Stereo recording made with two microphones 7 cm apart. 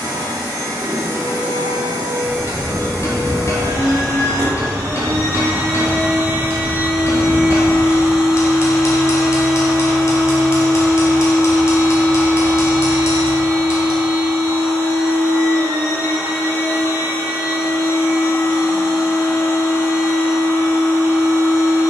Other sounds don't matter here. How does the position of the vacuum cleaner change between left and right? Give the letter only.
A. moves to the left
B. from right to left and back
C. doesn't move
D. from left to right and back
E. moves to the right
A.